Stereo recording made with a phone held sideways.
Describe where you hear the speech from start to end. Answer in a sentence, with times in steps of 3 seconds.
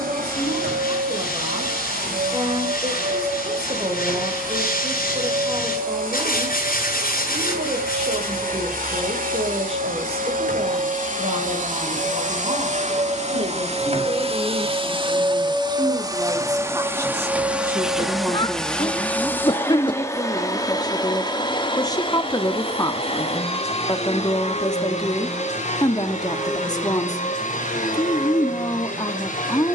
You can hear the speech on the right from 0 s, in the centre from 18 s and on the left from 21 s.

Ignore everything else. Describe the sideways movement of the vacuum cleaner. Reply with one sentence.
In this clip you hear the vacuum cleaner move from right to left.